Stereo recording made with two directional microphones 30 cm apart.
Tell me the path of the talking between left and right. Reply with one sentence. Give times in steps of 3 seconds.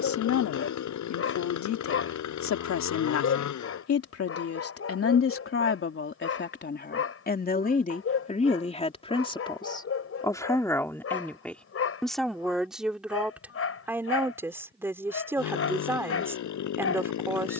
You can hear the talking on the left from 0 s and in the centre from 9 s.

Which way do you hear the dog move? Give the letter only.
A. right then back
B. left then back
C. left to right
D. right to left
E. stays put
E.